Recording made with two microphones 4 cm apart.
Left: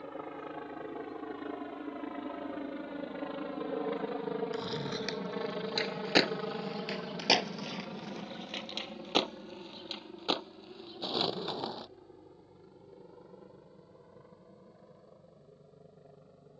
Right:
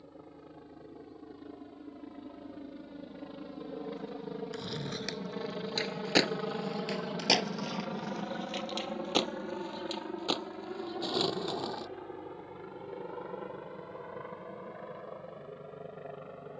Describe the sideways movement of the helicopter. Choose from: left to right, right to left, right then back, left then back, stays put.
left to right.